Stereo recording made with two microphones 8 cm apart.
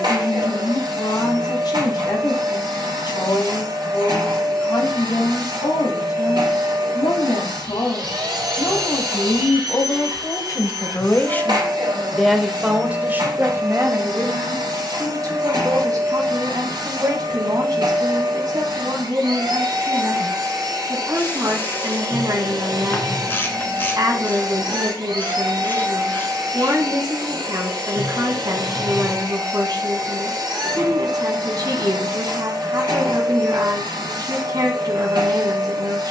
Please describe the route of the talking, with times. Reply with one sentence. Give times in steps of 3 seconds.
You can hear the talking on the left from 0 s and on the right from 12 s.